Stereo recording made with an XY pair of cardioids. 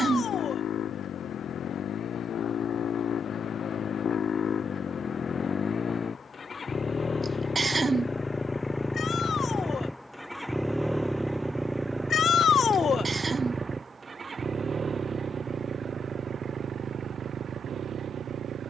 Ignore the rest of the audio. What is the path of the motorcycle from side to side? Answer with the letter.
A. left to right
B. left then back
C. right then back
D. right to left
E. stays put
A.